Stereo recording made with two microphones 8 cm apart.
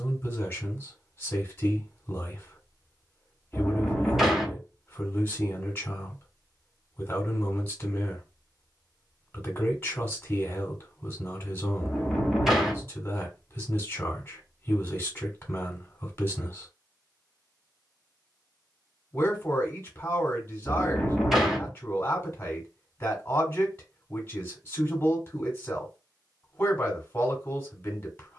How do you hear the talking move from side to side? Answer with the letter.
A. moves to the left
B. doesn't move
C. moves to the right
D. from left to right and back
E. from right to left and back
B.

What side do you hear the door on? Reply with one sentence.
In this clip you hear the door in the centre.